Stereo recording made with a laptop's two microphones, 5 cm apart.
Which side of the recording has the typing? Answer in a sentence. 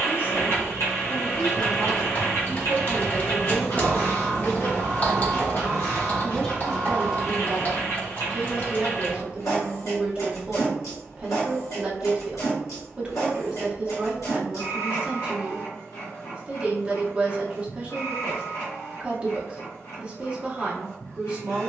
You can hear the typing on the left.